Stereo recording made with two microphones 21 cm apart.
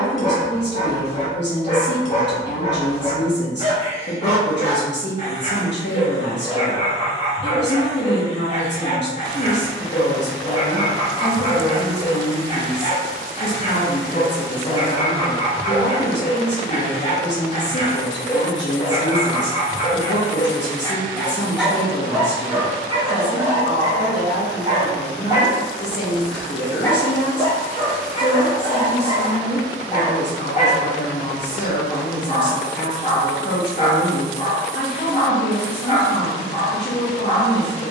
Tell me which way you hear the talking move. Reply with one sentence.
In this clip you hear the talking stay in one place.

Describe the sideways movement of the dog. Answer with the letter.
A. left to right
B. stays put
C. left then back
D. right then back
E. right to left
D.